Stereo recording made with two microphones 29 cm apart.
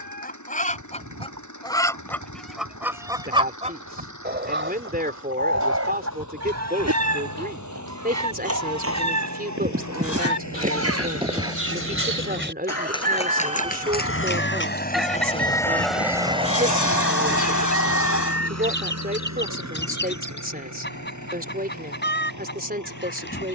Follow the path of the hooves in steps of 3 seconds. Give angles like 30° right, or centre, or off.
80° right, 70° right, 60° right, 30° right, 20° left, 50° left, off, off.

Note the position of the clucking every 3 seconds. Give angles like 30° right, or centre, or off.
10° left, 40° right, 70° right, 60° right, 20° right, 10° left, 40° left, 40° left.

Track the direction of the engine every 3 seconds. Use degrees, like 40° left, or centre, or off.
80° left, 80° left, 80° left, 70° left, 50° left, 20° right, 70° right, 80° right.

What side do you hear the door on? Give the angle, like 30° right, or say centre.
80° left.